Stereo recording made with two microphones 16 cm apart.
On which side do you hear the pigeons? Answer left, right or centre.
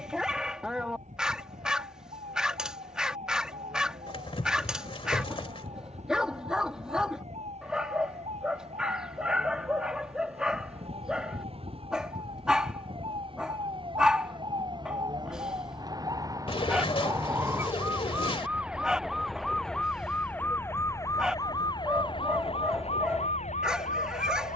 left.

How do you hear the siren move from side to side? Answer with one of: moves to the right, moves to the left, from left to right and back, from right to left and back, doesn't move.
moves to the left.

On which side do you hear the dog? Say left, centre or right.
centre.